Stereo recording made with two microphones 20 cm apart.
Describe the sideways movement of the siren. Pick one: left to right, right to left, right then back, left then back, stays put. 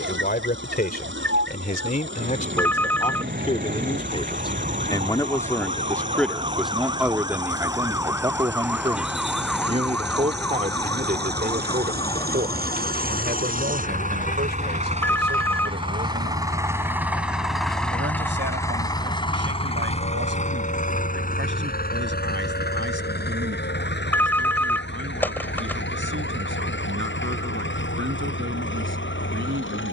right to left.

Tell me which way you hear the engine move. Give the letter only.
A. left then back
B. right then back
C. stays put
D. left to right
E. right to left
E.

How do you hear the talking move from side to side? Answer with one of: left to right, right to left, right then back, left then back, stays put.
left to right.